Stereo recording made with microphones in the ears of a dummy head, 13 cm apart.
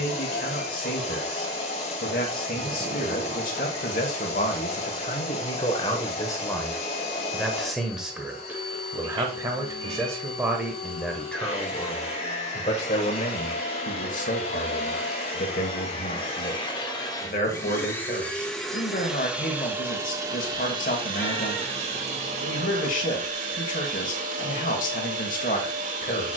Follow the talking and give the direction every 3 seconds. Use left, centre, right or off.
left, left, centre, centre, left, left, left, left, left.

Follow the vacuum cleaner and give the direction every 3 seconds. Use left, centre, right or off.
left, left, left, left, left, left, centre, right, right.